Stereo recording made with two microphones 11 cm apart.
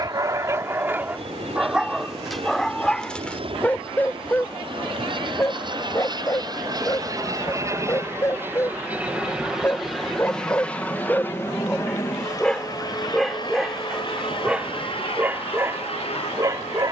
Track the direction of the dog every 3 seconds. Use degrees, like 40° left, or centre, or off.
10° right, 10° left, 30° left, 20° left, centre, 30° right.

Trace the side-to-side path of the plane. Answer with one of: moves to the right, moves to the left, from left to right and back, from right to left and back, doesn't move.
moves to the left.